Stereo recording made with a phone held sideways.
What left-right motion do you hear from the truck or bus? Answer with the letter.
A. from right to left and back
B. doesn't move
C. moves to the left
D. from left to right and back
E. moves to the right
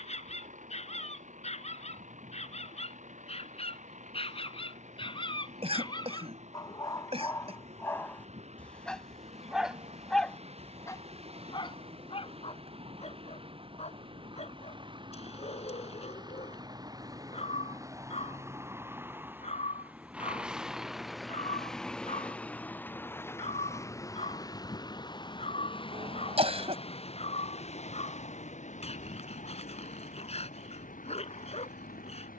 C.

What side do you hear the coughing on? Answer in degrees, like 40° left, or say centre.
40° right.